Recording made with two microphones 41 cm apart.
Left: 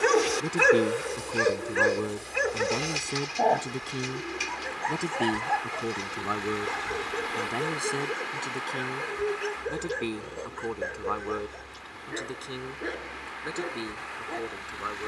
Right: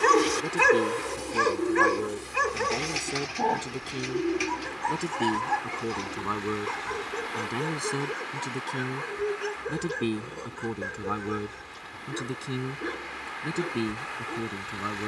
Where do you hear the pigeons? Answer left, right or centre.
right.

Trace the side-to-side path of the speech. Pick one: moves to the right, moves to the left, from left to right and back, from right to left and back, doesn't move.
moves to the right.